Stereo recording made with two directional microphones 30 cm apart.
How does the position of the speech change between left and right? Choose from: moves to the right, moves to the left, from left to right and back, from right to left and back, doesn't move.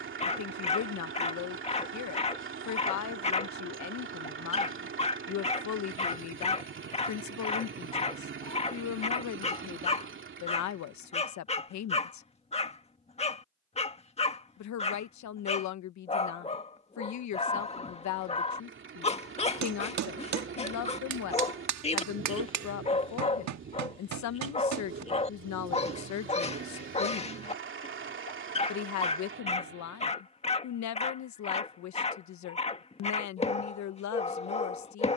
doesn't move.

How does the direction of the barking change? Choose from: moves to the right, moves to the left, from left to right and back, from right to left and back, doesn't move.
doesn't move.